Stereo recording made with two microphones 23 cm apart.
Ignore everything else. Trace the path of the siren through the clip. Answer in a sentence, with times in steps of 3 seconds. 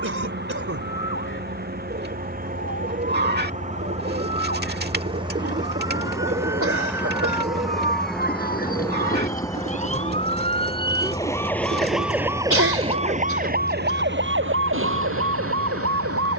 You can hear the siren on the left from 0 s and on the right from 12 s.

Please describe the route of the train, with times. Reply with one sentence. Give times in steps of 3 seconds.
In this clip you hear the train on the right from 0 s, in the centre from 6 s and on the left from 9 s.